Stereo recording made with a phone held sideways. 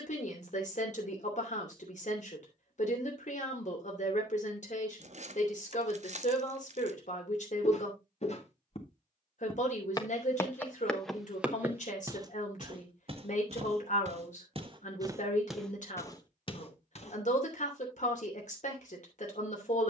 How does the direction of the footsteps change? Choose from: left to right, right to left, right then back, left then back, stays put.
right then back.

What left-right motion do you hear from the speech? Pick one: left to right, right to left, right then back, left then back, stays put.
stays put.